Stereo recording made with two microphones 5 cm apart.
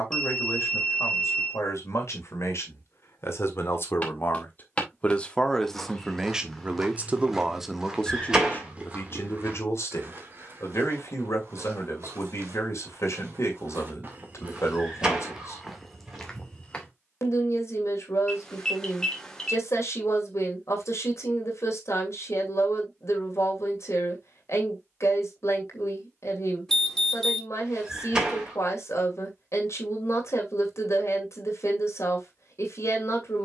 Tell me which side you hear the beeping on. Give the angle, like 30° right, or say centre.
10° left.